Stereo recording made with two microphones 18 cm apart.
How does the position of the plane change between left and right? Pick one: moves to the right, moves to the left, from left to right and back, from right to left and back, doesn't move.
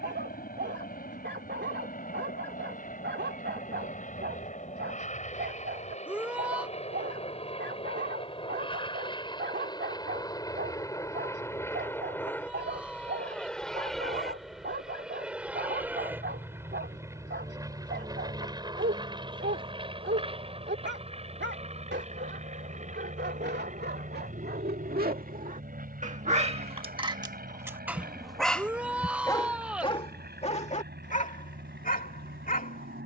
moves to the right.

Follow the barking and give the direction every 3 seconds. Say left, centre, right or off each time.
right, right, right, right, right, right, right, right, right, centre, left.